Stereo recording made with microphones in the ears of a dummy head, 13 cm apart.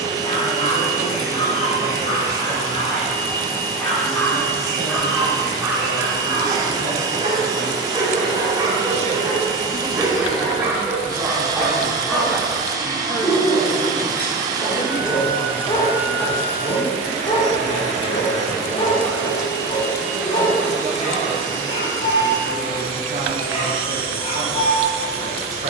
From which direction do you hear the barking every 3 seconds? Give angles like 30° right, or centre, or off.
40° left, centre, 30° right, 10° right, 10° left, 30° left, 40° left, 40° left, 40° left.